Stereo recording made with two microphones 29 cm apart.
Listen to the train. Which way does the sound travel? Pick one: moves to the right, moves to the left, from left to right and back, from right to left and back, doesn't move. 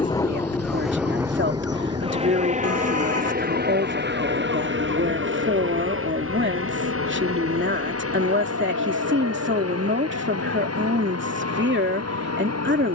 moves to the right.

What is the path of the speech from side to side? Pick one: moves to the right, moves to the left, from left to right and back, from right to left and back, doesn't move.
doesn't move.